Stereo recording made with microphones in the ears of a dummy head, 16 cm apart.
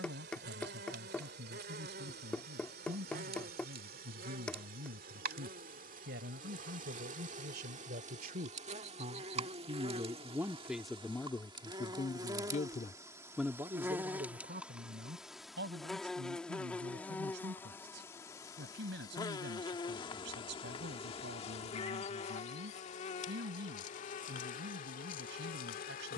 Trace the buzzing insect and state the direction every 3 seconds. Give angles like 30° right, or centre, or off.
60° right, 50° right, 40° right, 30° right, 10° right, 10° left, 20° left, 40° left, 50° left.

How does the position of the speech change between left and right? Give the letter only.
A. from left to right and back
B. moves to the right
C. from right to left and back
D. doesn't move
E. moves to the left
C.